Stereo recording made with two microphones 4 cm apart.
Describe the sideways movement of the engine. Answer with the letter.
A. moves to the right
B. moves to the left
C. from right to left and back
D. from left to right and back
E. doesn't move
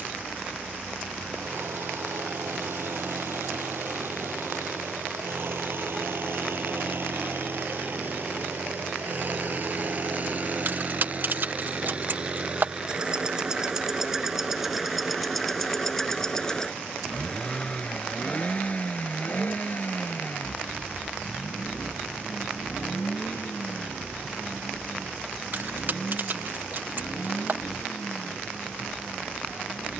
B.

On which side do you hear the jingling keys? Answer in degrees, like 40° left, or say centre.
50° right.